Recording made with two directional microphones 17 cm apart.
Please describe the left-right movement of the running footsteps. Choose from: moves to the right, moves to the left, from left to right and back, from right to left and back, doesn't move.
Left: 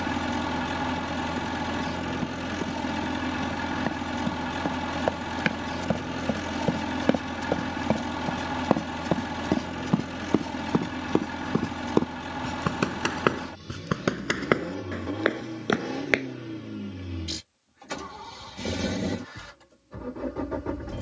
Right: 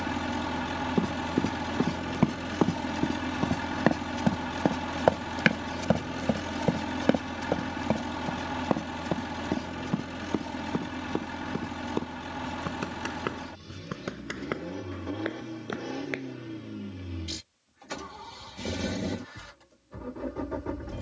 moves to the left.